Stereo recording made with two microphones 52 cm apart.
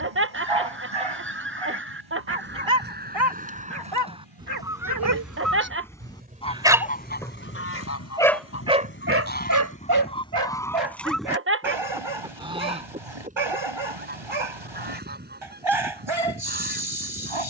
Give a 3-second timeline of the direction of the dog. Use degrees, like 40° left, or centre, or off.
60° right, 40° right, centre, 50° right, 60° right, 60° right.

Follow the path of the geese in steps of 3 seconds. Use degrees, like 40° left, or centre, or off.
20° right, 10° right, 20° left, 10° left, 10° right, 20° right.